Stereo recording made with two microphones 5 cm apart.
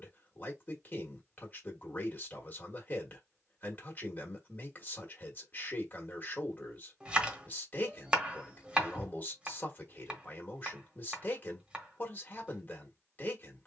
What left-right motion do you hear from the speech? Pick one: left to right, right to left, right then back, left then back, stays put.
stays put.